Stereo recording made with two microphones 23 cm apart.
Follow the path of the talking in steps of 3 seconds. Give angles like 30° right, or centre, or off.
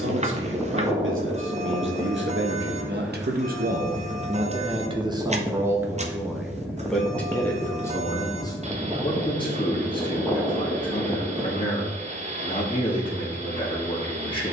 60° right, 30° right, 10° left, 20° left, 20° left.